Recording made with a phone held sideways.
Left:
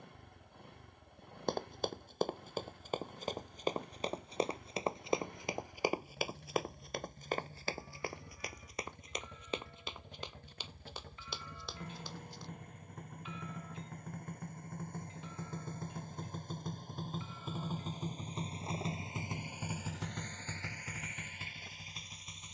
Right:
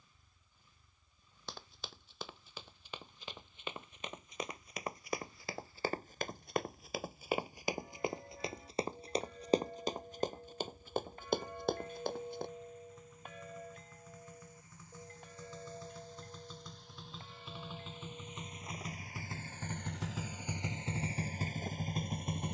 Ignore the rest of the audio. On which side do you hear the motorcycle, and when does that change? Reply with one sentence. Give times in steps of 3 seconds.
You can hear the motorcycle on the left from 0 s, in the centre from 18 s and on the right from 21 s.